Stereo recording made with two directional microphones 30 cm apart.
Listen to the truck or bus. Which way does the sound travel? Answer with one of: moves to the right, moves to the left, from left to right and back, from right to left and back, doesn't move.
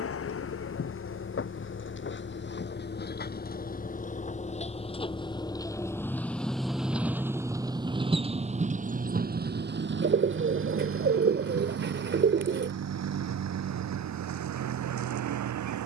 moves to the right.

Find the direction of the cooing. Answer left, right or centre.
right.